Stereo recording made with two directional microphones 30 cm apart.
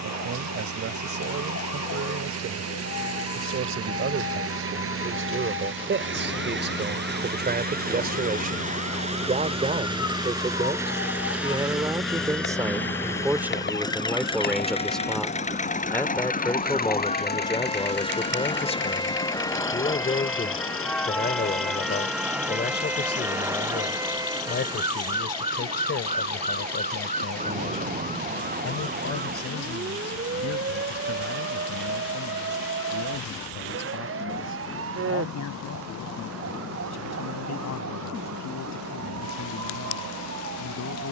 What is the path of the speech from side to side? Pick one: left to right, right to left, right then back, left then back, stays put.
right to left.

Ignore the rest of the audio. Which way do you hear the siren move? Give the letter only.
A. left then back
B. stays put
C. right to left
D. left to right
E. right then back
D.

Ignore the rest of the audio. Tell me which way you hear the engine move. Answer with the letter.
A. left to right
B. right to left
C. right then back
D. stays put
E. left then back
B.